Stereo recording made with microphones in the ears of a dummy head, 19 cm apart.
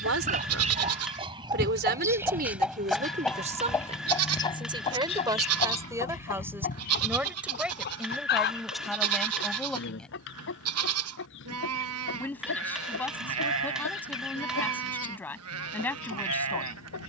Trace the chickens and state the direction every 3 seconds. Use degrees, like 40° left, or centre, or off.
20° right, 20° left, 50° left, 60° left, 70° left, 70° left.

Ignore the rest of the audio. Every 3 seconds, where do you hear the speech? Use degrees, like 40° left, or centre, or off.
50° right, 30° right, 10° right, centre, 10° left, 10° left.